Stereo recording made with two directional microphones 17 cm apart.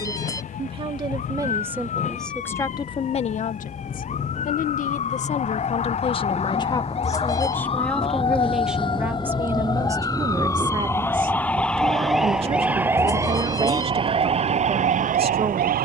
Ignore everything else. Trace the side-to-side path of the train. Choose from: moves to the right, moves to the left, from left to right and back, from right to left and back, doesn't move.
moves to the right.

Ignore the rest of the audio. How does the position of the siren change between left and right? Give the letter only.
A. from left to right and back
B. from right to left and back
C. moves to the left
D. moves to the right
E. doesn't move
D.